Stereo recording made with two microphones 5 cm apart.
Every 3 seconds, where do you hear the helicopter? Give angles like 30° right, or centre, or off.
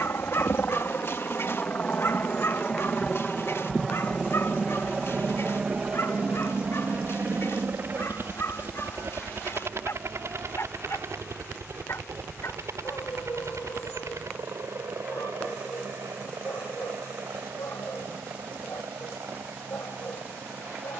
30° left, 10° right, 40° right, 60° right, 70° right, 70° right, 80° right.